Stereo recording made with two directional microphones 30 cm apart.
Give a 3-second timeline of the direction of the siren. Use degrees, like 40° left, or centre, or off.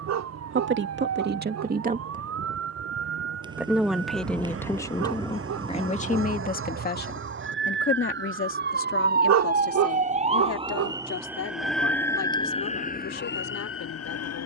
50° right, 50° right, 40° right, 20° right, 30° left.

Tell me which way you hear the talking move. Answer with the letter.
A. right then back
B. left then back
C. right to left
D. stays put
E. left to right
C.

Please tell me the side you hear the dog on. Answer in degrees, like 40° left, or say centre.
60° right.